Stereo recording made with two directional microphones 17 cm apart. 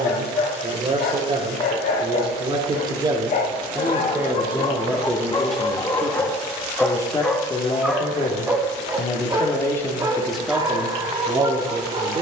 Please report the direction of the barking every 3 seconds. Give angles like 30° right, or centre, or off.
60° left, 30° left, centre, 20° right.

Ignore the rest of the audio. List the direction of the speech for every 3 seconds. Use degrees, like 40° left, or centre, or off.
30° right, 10° right, 20° left, centre.